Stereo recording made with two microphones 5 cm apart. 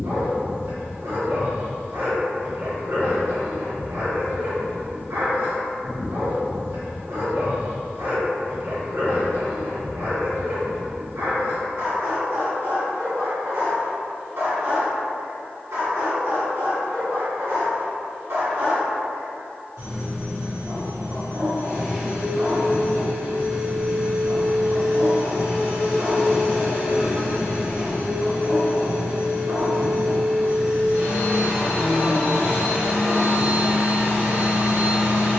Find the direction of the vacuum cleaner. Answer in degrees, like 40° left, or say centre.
70° right.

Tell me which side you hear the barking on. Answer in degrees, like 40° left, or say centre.
80° right.